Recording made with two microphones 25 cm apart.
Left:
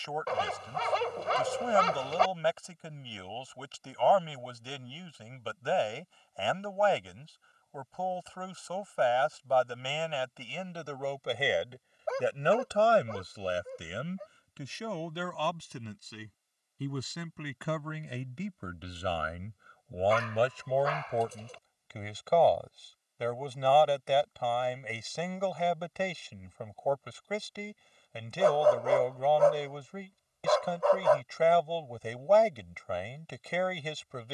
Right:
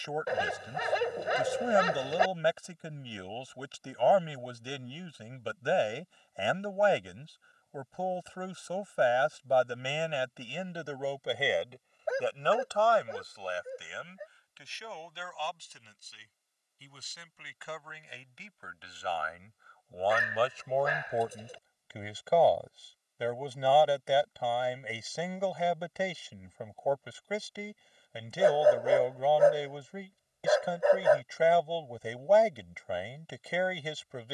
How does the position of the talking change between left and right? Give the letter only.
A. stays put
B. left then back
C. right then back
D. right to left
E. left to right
B.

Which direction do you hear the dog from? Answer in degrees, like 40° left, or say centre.
10° right.